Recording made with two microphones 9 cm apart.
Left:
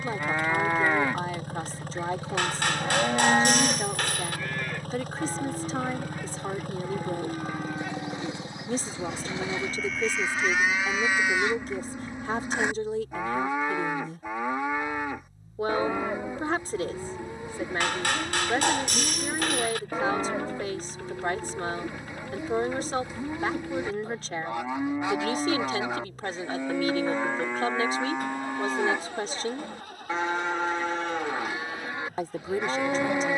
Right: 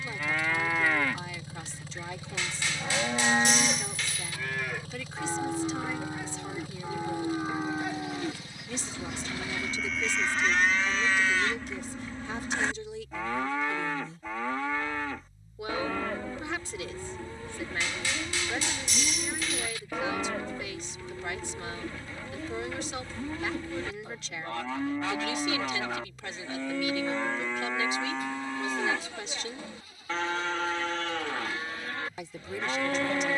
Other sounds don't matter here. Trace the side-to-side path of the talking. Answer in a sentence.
You can hear the talking stay put.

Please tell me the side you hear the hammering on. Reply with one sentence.
In this clip you hear the hammering on the left.